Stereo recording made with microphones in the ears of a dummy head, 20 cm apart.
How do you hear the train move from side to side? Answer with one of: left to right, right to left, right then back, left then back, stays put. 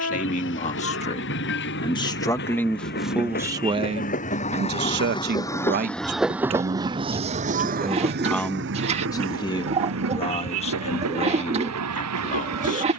left to right.